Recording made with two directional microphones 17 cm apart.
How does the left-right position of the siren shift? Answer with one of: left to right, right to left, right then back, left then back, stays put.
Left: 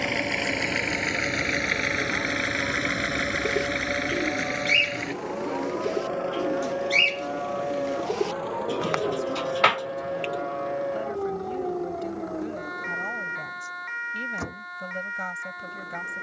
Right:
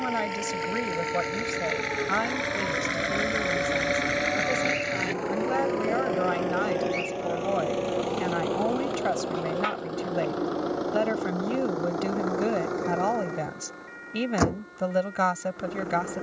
right to left.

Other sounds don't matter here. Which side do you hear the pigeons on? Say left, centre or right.
left.